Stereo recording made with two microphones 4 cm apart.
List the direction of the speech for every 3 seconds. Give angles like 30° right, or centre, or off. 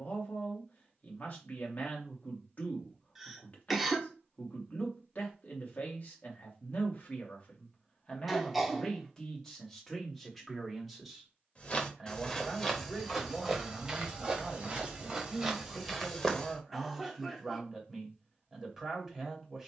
40° left, 40° left, 30° left, centre, 10° right, 10° right, 10° right.